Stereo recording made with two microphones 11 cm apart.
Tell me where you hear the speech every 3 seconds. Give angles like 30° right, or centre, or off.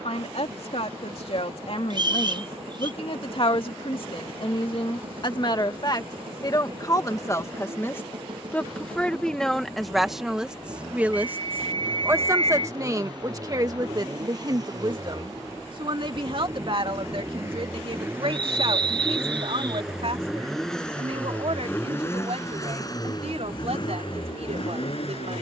60° left, 50° left, 20° left, centre, 30° right, 50° right, 60° right, 60° right, 70° right.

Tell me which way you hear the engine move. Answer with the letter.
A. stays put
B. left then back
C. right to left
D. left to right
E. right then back
C.